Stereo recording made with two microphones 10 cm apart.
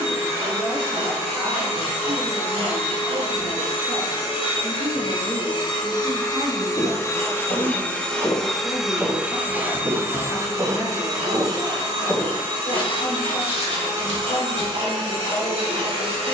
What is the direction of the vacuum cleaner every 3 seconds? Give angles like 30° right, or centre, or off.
70° left, 50° left, 20° left, 30° right, 50° right, 60° right.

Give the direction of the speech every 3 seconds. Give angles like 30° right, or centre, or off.
50° right, 40° right, centre, 50° left, 70° left, 80° left.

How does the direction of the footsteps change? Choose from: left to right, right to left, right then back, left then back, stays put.
right then back.